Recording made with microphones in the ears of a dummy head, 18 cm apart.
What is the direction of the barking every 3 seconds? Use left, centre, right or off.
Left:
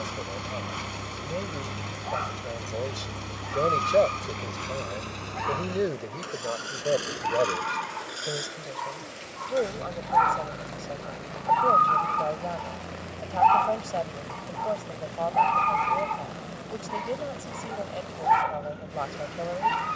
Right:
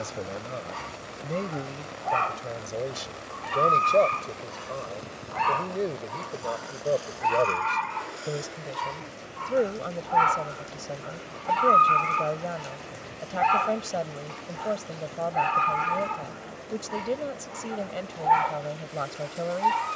right, right, right, right, right, centre, centre.